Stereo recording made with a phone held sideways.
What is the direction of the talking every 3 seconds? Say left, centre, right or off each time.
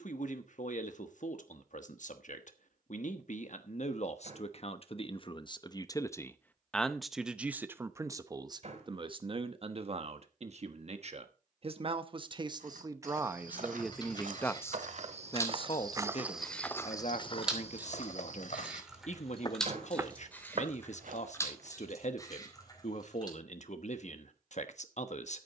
left, left, centre, right, centre, left, left, left, left.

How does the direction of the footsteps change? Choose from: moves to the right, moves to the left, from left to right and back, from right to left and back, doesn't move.
from right to left and back.